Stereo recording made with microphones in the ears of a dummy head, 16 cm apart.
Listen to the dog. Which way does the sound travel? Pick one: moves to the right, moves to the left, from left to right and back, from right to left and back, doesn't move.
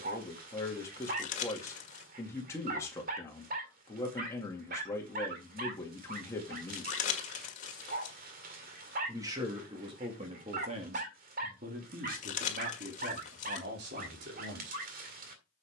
doesn't move.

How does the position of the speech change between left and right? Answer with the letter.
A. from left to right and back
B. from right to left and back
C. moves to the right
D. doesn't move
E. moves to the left
C.